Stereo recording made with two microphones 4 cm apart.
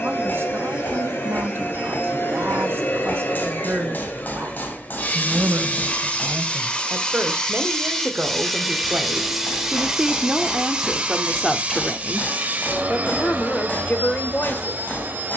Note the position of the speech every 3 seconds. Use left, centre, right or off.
right, right, right, centre, left.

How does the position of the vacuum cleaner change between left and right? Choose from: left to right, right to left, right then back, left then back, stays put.
left to right.